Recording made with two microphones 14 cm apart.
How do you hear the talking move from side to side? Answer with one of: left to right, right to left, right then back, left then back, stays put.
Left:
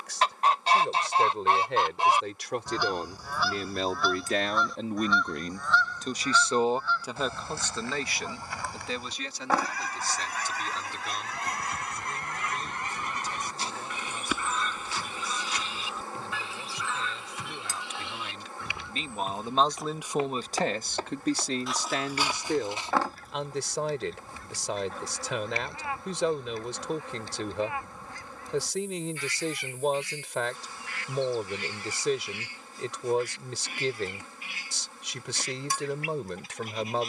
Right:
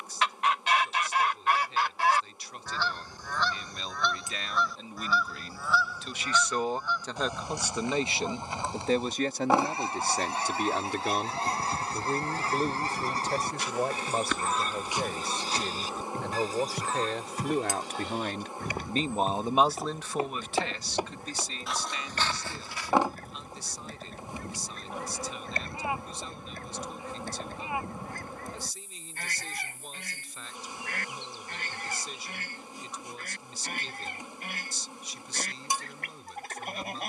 right then back.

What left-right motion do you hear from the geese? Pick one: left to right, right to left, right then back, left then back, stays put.
left to right.